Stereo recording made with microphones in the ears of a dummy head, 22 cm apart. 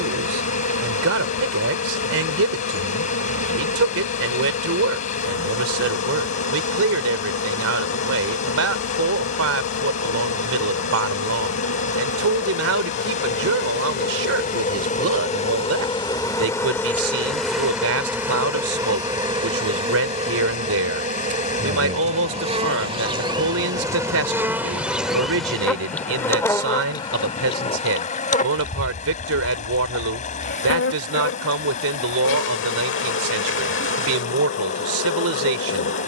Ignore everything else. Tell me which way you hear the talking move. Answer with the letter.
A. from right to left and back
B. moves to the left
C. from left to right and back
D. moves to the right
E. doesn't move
E.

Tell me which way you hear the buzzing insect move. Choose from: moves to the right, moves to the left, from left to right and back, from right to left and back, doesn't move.
from left to right and back.